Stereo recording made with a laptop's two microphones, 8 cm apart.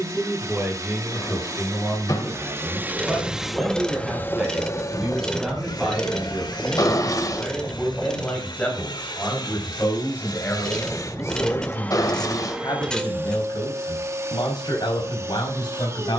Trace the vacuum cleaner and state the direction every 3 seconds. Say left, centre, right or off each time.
right, left, left, left, right, right.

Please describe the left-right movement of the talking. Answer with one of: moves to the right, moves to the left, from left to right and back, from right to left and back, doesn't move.
moves to the left.